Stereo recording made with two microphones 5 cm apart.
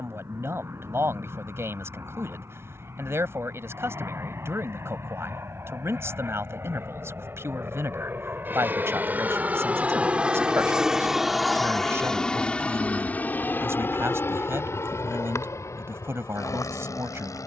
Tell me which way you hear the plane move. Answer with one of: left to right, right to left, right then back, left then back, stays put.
right to left.